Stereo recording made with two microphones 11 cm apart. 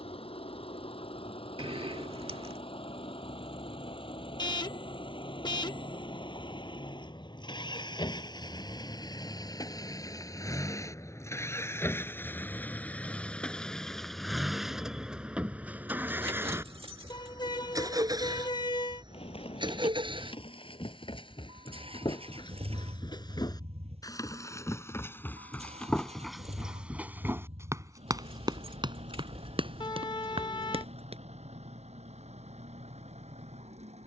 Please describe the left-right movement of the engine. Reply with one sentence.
In this clip you hear the engine travel towards the right.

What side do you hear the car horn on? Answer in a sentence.
You can hear the car horn on the left.